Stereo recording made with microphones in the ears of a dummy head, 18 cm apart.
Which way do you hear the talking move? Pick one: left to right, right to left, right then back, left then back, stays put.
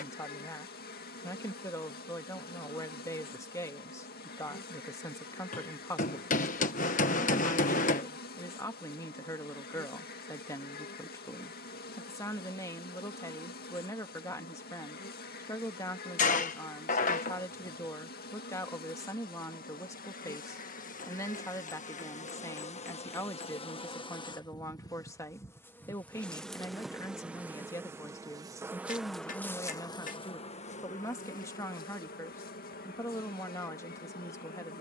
stays put.